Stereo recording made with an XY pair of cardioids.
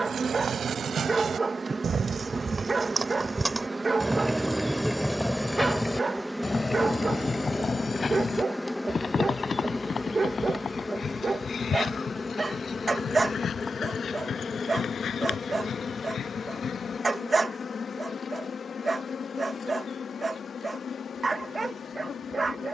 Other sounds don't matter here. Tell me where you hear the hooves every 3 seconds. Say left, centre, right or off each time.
right, centre, left, left, left, left, off, off.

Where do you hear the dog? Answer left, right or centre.
right.